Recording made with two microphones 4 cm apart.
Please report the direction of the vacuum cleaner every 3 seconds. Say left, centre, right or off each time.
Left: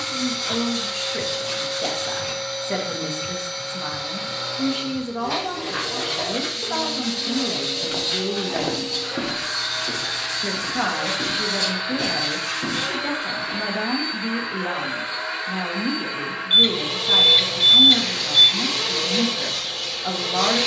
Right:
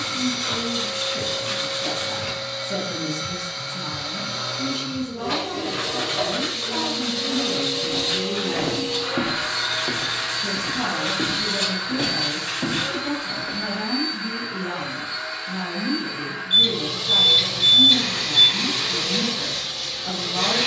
right, right, right, centre, left, left, left.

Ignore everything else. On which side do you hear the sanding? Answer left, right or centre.
right.